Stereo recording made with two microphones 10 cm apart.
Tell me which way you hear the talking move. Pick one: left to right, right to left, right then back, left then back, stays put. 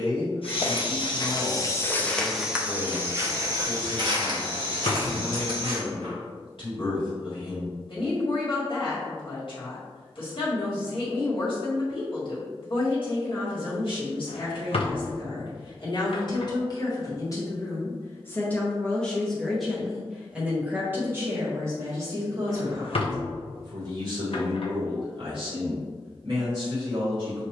left to right.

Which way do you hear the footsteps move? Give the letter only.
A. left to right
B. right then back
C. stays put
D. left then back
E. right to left
A.